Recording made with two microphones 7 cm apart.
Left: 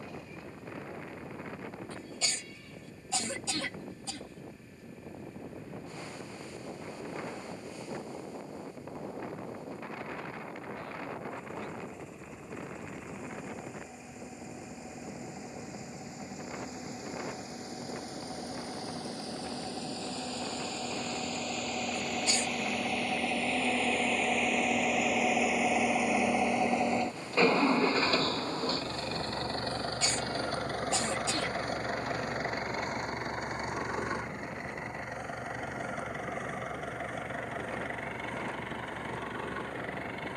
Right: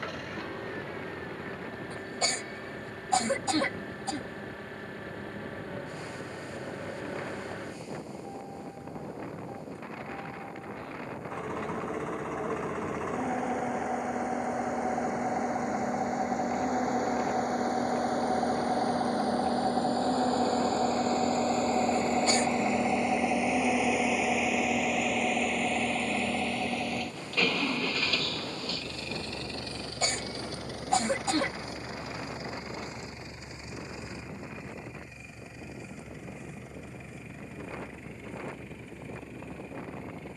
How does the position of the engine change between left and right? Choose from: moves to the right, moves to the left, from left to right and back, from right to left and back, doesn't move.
moves to the left.